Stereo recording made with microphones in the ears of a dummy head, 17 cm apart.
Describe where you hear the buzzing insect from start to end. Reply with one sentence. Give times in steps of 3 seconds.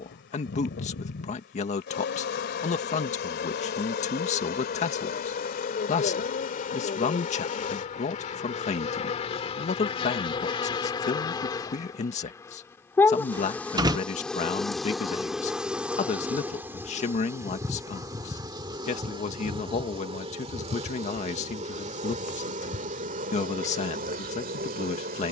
You can hear the buzzing insect on the left from 0 s, in the centre from 12 s and on the right from 18 s.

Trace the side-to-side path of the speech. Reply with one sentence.
You can hear the speech stay in one place.